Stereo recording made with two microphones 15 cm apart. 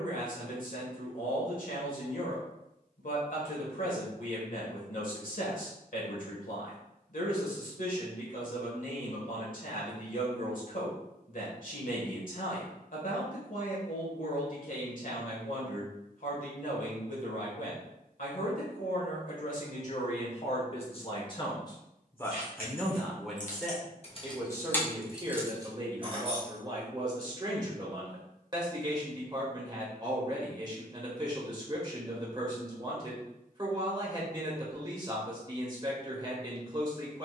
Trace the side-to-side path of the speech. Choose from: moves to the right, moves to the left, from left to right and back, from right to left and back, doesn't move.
moves to the right.